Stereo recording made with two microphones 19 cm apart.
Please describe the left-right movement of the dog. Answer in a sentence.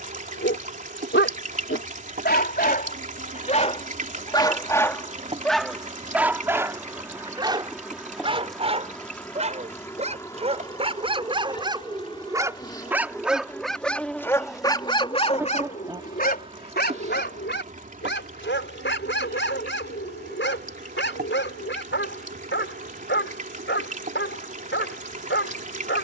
You can hear the dog move from left to right and back again.